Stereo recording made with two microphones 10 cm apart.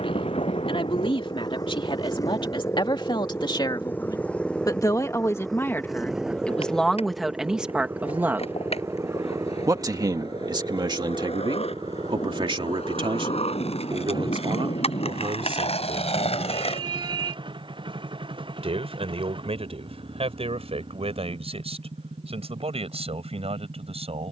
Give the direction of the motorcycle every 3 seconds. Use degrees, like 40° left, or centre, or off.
40° left, 10° left, 10° right, 30° right, 40° right, 50° right, 50° right, 60° right.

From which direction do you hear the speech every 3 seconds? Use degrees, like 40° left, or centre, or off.
60° left, 30° left, centre, 40° right, 60° right, 70° right, 70° right, 80° right.